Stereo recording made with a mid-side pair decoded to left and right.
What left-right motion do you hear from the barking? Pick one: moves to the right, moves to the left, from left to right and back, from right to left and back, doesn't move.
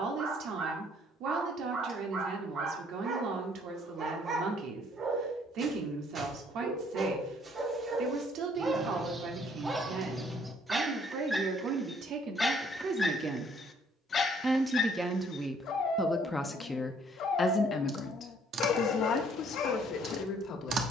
moves to the left.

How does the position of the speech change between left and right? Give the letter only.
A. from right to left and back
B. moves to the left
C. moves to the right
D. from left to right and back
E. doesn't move
B.